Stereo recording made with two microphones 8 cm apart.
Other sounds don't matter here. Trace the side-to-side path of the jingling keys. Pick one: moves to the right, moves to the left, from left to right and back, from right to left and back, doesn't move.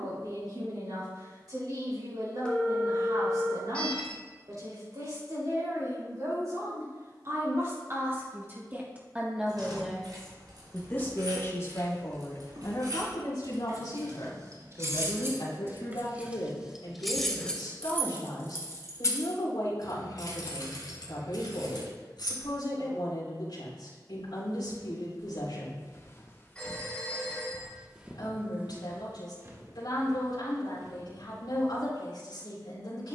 moves to the left.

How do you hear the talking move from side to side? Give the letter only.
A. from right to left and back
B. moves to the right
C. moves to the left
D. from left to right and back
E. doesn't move
C.